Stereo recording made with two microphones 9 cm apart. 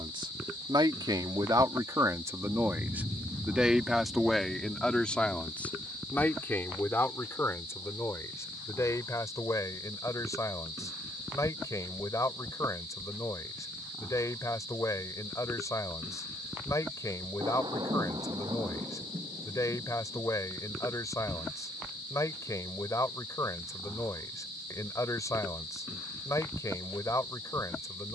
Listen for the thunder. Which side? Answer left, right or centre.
right.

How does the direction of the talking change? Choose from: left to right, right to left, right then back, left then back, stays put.
right to left.